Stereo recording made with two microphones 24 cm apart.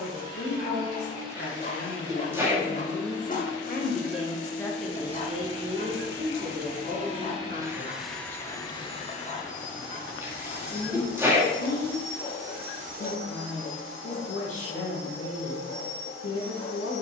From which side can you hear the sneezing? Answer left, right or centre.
centre.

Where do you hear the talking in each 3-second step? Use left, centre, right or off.
left, centre, right, left, left, left.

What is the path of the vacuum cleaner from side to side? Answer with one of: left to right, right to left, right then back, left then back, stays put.
left then back.